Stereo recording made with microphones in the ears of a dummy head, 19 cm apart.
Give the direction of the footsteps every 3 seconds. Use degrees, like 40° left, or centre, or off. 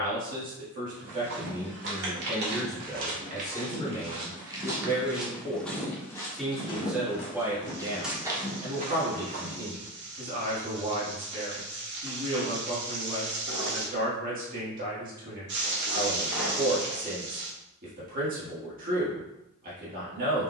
50° right, 20° right, centre, 60° right, off, off, off.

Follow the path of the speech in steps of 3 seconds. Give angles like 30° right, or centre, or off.
20° right, 20° left, 10° right, 40° right, 40° right, 40° right, 40° right.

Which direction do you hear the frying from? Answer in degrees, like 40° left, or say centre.
50° right.